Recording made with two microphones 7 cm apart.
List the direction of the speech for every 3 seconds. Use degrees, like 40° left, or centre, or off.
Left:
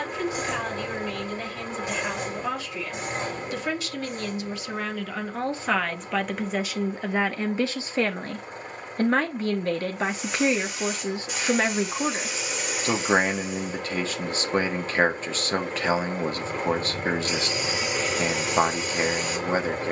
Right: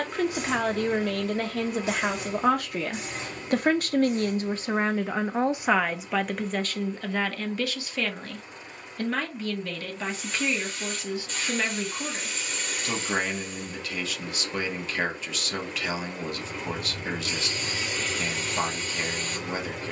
60° right, 30° right, 20° left, 40° left, 40° left, 40° left, 40° left.